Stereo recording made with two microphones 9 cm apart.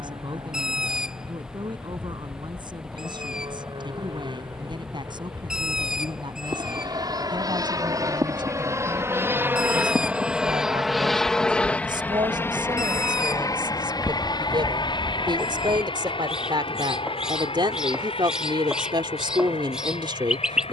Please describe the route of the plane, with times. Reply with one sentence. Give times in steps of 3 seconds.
In this clip you hear the plane on the right from 0 s, in the centre from 9 s and on the left from 12 s.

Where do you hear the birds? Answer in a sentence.
In this clip you hear the birds in the centre.